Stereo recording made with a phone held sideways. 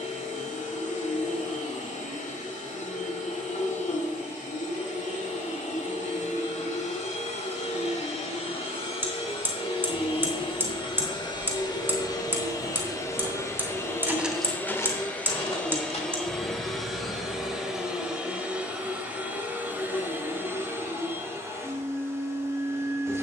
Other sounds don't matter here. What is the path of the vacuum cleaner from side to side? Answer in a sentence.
In this clip you hear the vacuum cleaner go from the left side to the right.